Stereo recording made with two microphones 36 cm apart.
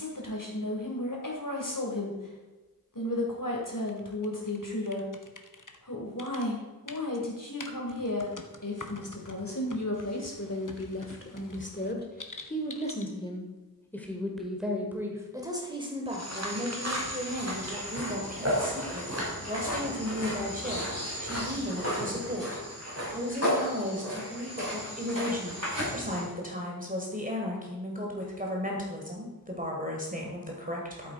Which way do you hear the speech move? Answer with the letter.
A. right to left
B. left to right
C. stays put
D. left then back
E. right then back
B.